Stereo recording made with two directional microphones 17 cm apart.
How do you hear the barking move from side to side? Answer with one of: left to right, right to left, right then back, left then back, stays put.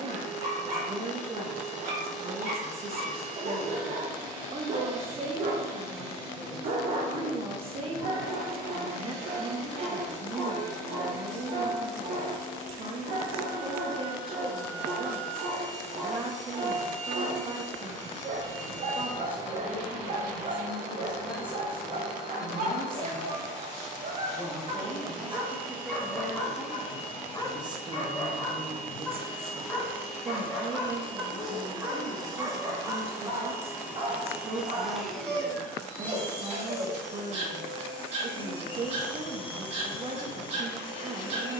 left then back.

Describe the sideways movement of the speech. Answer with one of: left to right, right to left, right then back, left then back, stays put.
left then back.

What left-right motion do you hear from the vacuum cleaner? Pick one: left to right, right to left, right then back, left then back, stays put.
right to left.